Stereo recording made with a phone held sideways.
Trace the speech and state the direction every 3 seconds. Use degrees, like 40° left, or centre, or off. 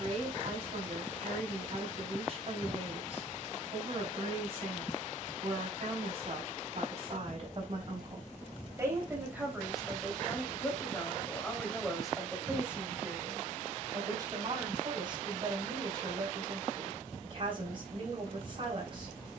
40° right, 40° right, 40° right, centre, 20° right, 40° right, 40° right.